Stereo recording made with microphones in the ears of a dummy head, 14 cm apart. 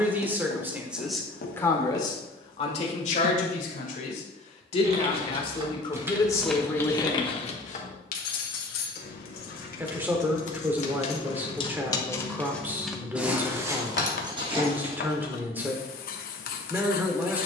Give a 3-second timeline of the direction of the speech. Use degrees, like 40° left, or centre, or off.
10° left, 40° left, 10° left, 10° right, 10° right, 10° right.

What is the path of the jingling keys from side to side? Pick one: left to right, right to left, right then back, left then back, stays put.
left then back.